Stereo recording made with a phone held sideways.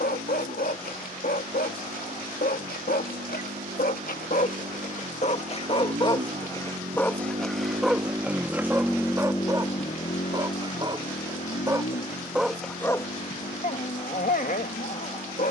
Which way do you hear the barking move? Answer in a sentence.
You can hear the barking go right and come back.